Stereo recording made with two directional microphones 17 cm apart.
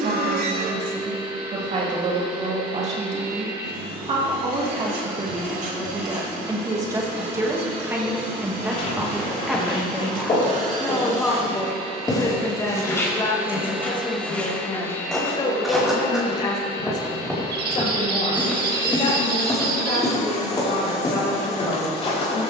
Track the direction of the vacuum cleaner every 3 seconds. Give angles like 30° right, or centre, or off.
70° right, 70° right, 60° right, 50° right, 10° right, 30° left, 40° left, 40° left.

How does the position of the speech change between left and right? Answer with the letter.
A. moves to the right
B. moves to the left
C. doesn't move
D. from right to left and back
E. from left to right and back
B.